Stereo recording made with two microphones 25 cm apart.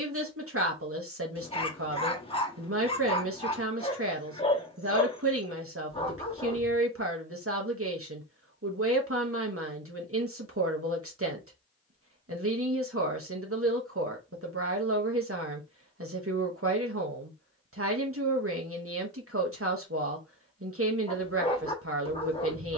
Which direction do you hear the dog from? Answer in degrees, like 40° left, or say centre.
20° left.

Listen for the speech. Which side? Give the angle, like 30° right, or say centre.
60° right.